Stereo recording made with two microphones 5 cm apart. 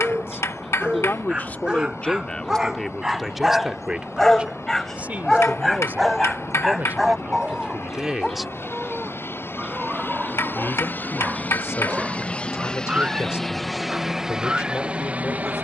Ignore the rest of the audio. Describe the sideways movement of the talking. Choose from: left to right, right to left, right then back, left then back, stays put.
right then back.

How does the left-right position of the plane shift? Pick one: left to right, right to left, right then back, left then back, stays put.
left to right.